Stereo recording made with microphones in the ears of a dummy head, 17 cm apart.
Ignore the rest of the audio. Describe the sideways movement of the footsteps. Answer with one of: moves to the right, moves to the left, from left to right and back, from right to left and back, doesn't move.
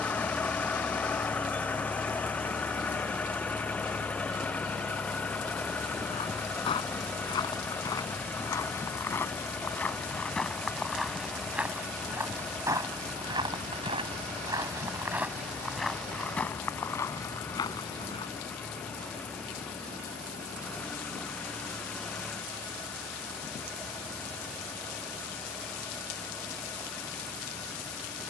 from left to right and back.